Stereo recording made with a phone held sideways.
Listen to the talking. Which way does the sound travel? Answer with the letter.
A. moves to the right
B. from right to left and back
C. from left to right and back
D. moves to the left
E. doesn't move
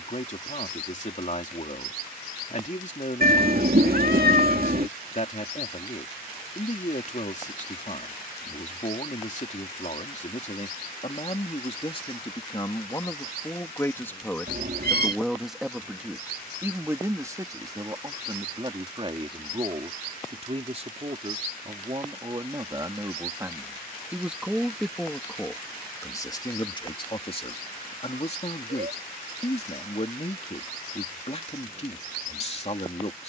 C.